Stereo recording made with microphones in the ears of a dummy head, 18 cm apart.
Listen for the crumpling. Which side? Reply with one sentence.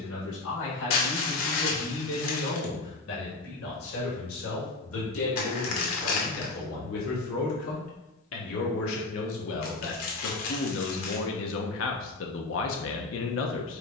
In this clip you hear the crumpling on the left.